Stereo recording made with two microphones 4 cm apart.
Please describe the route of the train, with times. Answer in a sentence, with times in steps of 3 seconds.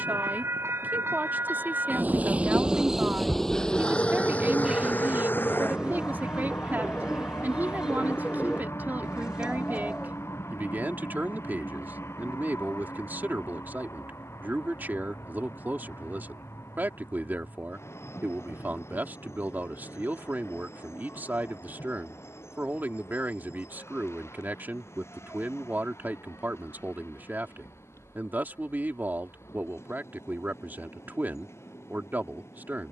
In this clip you hear the train on the right from 0 s and on the left from 3 s.